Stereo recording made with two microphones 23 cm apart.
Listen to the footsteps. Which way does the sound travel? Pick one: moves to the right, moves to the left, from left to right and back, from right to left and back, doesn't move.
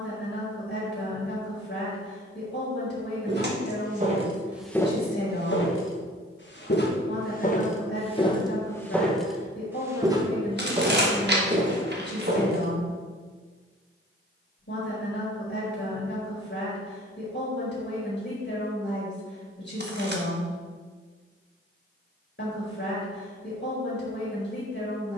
from right to left and back.